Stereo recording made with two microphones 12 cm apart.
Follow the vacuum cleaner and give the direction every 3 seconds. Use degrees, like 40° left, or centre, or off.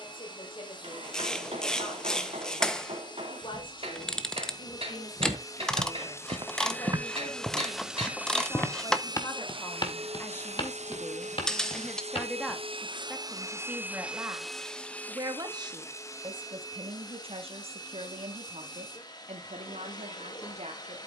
40° left, 30° left, centre, 60° right, 30° right, 30° left, 40° left.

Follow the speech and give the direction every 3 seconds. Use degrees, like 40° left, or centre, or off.
50° left, 40° left, 30° left, 20° left, 10° right, 40° right, 60° right.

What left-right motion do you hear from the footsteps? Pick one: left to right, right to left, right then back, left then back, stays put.
right to left.